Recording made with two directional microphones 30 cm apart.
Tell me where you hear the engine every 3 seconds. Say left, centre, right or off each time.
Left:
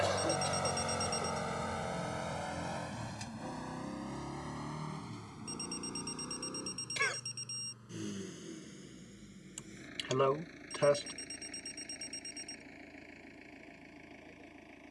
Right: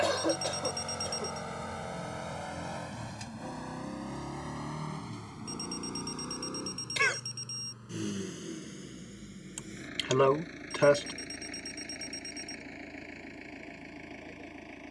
centre, right, right, right, right.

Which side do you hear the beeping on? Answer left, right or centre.
right.